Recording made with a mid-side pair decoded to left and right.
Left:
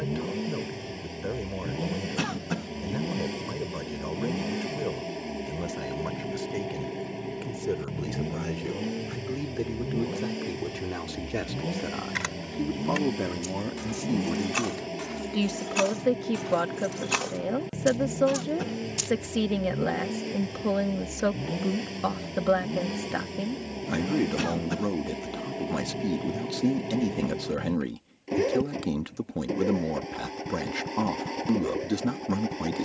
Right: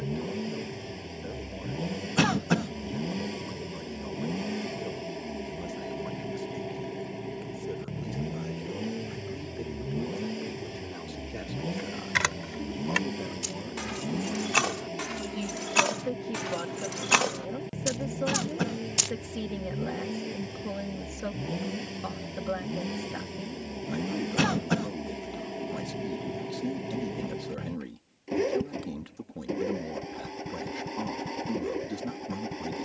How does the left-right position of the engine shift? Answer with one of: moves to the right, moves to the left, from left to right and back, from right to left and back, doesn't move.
doesn't move.